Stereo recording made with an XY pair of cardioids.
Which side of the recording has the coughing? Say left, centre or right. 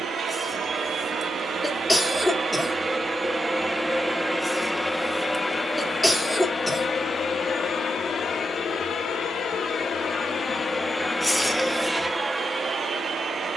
centre.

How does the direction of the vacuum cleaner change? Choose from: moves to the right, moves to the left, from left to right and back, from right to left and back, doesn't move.
from right to left and back.